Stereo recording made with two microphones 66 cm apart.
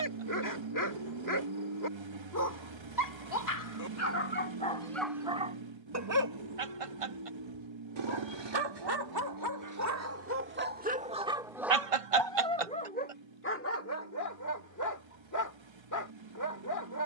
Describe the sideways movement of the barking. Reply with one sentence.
You can hear the barking move from left to right and back again.